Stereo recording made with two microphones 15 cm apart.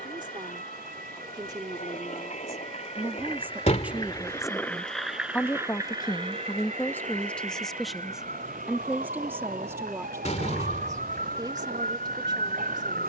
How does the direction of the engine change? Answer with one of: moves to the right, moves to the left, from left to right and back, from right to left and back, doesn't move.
moves to the right.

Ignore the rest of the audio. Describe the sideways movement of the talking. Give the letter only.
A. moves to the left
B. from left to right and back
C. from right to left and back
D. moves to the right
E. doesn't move
C.